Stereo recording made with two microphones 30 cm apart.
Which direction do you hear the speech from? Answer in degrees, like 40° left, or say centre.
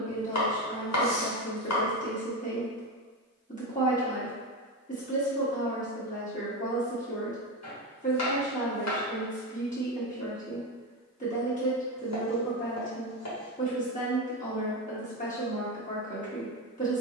30° left.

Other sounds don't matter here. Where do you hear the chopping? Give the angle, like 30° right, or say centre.
60° left.